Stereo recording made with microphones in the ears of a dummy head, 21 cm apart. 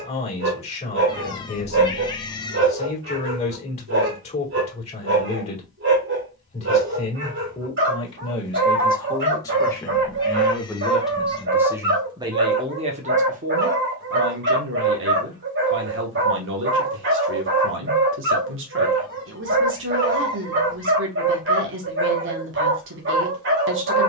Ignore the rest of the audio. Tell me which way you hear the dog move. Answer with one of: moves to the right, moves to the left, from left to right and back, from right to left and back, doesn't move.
doesn't move.